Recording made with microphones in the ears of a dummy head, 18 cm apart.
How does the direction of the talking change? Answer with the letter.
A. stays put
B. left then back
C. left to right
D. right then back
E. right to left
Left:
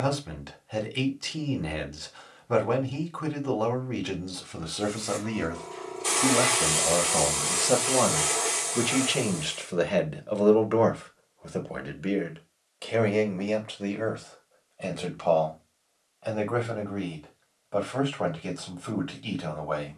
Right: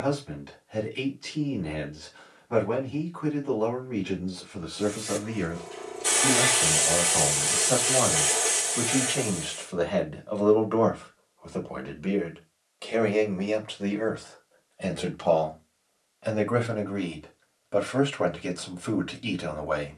C.